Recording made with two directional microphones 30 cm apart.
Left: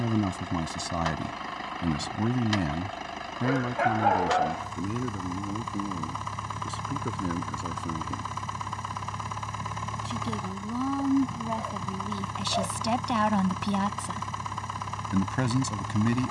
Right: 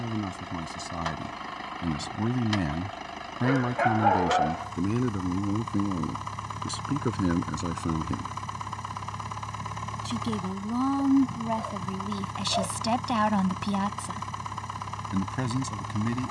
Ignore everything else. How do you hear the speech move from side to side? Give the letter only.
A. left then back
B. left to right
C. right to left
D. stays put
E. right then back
E.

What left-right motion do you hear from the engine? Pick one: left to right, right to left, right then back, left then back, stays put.
stays put.